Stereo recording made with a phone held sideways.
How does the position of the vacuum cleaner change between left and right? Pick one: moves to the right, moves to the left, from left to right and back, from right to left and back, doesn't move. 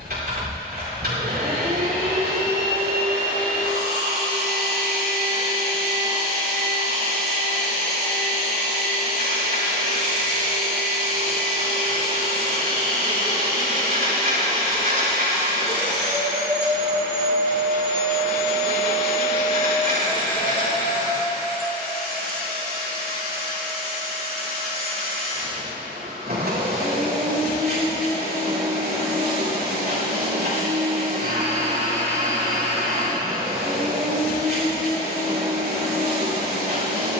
doesn't move.